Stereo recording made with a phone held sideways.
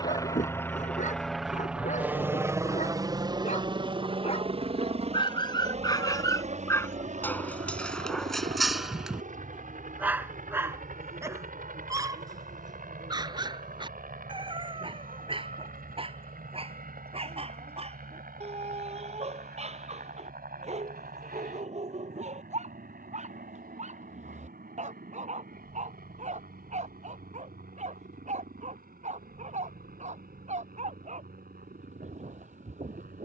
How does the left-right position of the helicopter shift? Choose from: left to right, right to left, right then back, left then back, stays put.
left to right.